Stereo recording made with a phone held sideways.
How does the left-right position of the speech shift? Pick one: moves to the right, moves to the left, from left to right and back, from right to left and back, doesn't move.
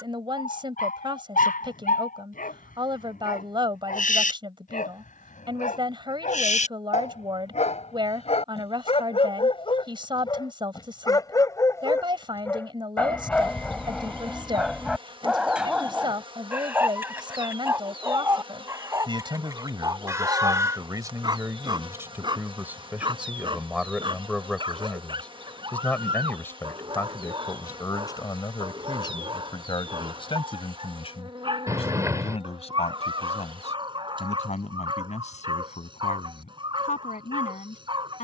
moves to the left.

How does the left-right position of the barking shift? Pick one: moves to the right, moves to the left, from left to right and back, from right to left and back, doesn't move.
moves to the right.